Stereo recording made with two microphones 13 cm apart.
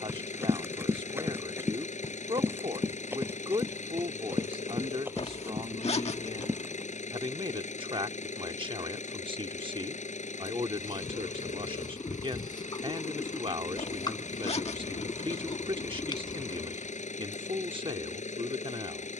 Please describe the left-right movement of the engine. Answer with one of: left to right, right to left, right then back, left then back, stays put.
stays put.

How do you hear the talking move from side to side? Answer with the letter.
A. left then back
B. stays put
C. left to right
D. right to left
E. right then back
B.